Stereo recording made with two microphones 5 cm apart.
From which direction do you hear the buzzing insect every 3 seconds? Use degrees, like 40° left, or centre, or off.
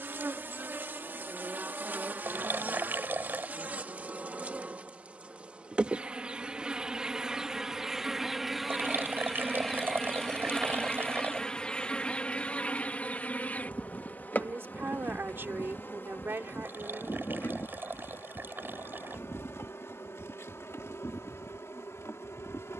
40° right, 30° right, 10° right, 10° left, 30° left, 50° left, 60° left, 70° left.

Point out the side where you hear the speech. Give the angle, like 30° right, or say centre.
50° right.